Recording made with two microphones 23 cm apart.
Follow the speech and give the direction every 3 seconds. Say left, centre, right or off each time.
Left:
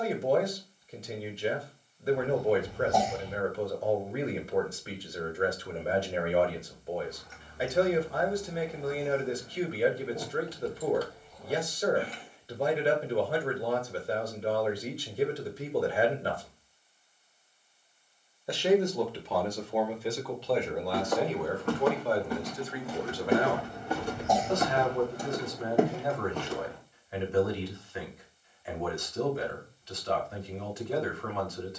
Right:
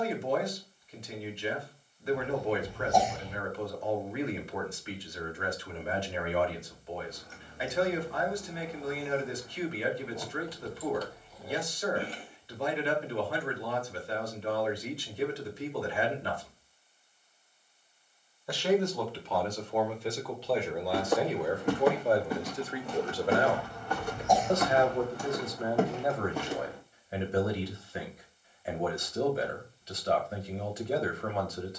left, left, left, left, left, left, centre, right, right, right, right.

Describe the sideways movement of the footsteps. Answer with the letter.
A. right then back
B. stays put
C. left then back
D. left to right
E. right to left
C.